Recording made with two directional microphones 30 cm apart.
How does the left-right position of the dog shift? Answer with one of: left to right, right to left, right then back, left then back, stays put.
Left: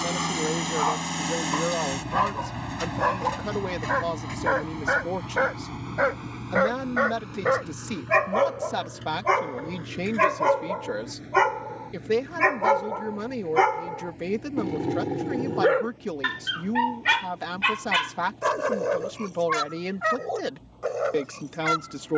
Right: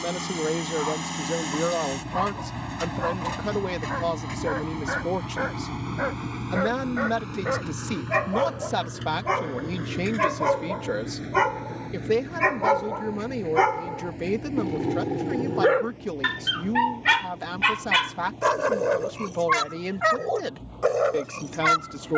left to right.